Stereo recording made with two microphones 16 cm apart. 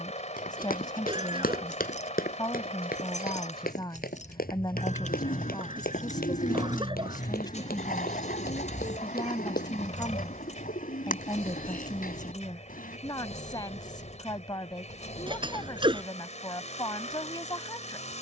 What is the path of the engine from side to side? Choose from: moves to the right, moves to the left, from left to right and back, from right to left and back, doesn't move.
doesn't move.